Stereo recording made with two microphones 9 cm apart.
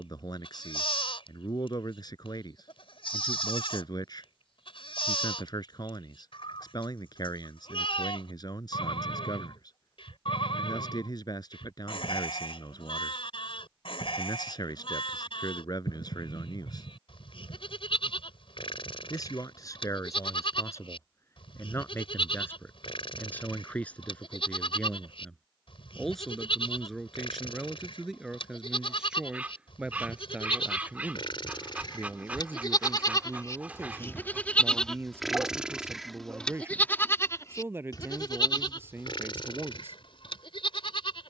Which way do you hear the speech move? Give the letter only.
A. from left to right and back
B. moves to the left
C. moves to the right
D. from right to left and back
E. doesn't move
C.